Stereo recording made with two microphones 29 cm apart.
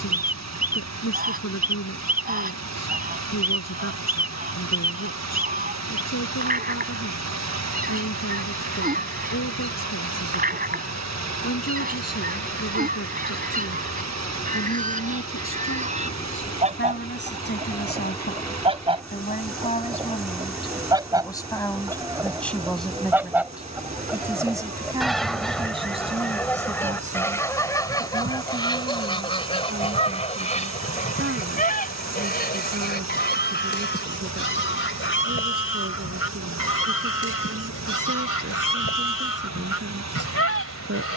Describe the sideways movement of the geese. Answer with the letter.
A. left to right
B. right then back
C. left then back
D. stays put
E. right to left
E.